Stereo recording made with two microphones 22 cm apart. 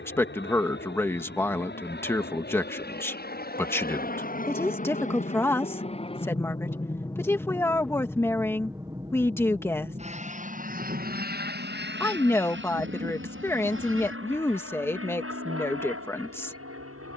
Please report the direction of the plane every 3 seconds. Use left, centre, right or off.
left, left, centre, right, right, right.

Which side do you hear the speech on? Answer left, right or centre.
centre.